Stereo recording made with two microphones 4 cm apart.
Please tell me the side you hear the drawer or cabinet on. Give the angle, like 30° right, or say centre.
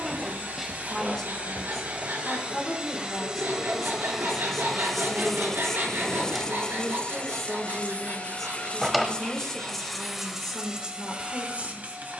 centre.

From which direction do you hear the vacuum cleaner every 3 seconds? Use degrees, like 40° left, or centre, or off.
40° right, 10° right, 30° left, 10° right.